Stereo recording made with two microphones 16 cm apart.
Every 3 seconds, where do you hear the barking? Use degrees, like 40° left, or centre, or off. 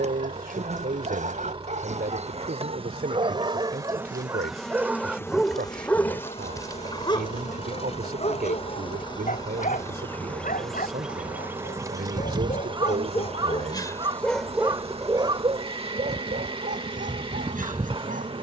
50° right, 20° right, 30° left, 60° left, 30° left, 50° right.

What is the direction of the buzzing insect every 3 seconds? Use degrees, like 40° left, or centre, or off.
40° right, centre, 40° left, 10° left, 40° right, 40° right.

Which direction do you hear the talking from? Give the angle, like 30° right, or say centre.
70° right.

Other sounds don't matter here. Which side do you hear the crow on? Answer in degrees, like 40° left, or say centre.
30° right.